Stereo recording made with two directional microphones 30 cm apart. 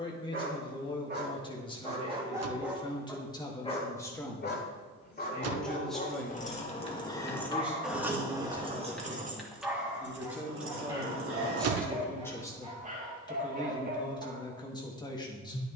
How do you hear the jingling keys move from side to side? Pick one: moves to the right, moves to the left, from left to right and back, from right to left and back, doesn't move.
moves to the right.